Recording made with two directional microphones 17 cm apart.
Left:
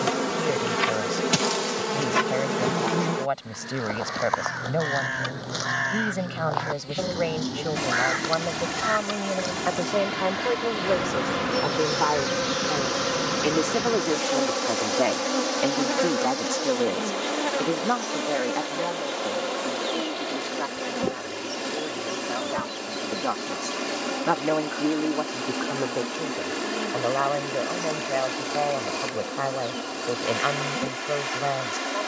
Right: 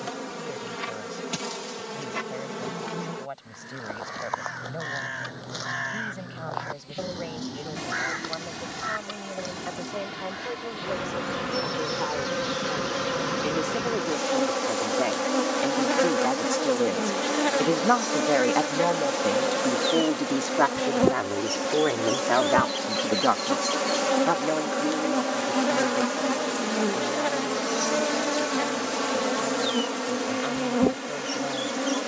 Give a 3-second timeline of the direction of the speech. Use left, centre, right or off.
left, left, left, left, left, centre, right, right, left, left, left.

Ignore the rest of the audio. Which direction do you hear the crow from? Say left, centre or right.
left.